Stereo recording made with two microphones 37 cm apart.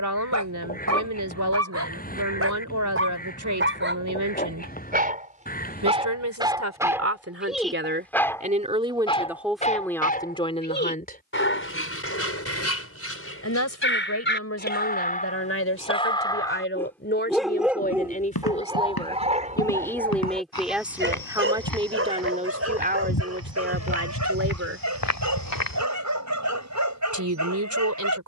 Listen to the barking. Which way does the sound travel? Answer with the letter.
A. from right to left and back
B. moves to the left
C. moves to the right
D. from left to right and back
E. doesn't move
A.